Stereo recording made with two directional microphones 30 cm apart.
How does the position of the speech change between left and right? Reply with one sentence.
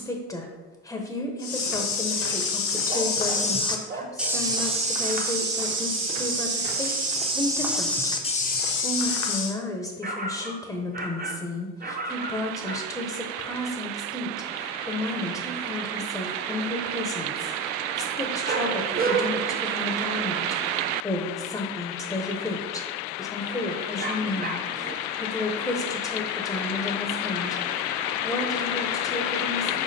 You can hear the speech stay in one place.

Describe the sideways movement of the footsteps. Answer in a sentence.
In this clip you hear the footsteps go right and come back.